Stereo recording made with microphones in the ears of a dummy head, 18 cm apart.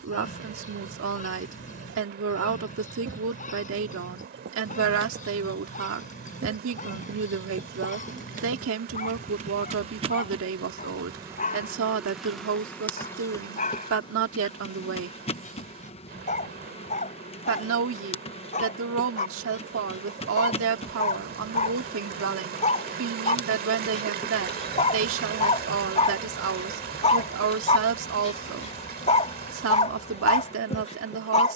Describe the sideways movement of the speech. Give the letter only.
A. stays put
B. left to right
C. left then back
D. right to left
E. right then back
A.